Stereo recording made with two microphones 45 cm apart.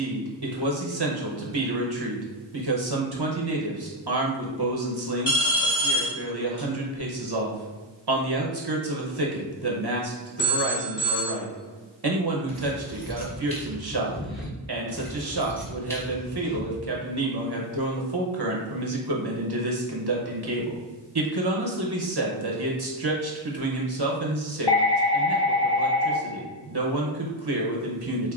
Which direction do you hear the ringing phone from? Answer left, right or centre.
left.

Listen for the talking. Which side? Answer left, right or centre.
right.